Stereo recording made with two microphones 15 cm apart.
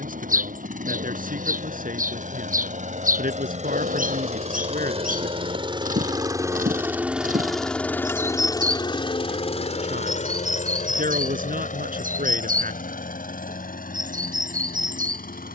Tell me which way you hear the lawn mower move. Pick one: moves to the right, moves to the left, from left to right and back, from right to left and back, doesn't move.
moves to the left.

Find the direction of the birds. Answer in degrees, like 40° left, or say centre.
70° right.